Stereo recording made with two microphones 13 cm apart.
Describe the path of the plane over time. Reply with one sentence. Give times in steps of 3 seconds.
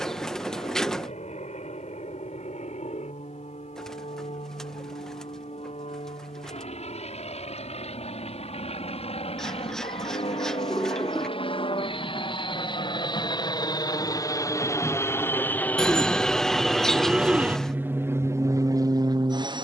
You can hear the plane on the left from 0 s, in the centre from 15 s and on the right from 18 s.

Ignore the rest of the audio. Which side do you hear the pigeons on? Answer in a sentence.
You can hear the pigeons in the centre.